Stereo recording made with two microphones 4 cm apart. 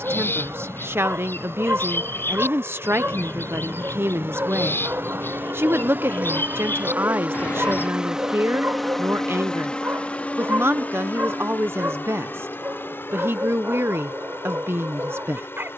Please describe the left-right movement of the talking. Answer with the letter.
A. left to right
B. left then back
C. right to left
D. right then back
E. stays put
E.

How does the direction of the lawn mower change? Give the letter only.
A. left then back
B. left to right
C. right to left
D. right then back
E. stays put
C.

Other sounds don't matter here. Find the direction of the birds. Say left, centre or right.
left.